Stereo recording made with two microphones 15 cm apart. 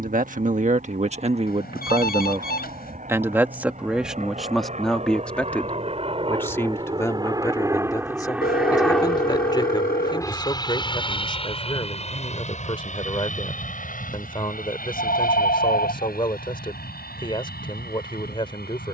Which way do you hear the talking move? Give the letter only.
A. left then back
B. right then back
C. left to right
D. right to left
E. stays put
D.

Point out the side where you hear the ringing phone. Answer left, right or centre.
left.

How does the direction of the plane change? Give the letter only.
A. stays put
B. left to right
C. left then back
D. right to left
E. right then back
D.